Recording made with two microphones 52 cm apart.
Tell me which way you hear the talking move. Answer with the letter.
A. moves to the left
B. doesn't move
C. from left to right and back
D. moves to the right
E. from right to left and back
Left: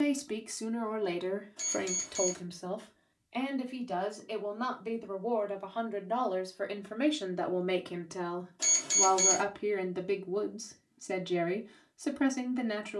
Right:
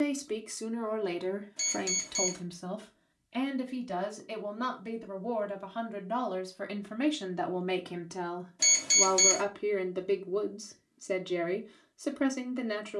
C.